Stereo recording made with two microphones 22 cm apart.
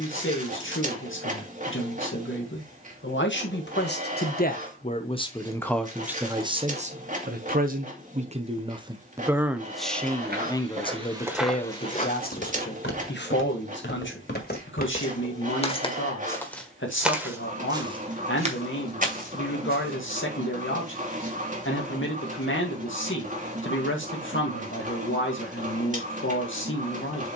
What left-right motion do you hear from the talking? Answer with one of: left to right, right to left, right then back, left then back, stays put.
right then back.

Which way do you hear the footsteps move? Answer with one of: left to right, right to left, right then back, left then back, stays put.
left then back.